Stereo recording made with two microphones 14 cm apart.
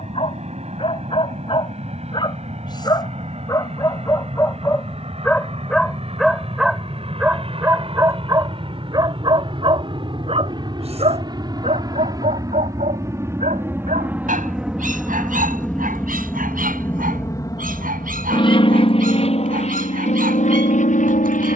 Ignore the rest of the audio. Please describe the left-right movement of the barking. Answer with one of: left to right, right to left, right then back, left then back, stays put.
left to right.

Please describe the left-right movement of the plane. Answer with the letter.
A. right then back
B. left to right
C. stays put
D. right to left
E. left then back
D.